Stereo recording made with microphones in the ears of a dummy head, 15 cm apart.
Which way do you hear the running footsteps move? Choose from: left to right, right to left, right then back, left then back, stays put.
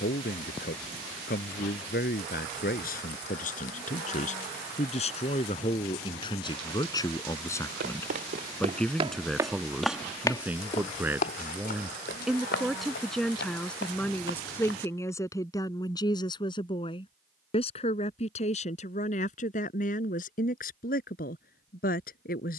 right to left.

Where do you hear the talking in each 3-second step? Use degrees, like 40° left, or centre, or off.
60° left, 40° left, 20° left, 10° right, 10° left, 30° left, 50° left, 50° left.